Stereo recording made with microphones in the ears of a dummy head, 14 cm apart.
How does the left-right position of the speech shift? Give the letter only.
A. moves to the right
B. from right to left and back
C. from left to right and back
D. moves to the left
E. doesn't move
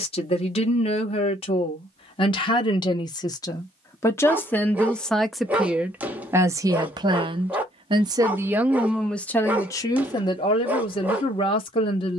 C.